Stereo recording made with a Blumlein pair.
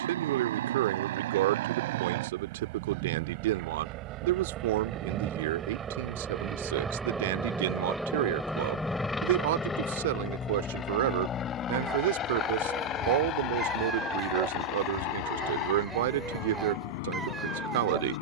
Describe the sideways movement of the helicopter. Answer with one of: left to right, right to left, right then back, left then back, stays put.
right to left.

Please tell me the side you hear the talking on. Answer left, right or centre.
right.